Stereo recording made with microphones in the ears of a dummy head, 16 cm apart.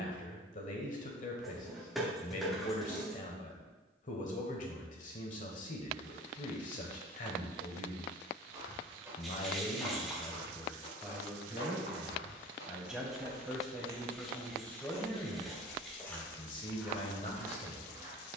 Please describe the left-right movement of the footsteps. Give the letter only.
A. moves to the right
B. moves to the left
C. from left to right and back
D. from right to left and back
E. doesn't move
D.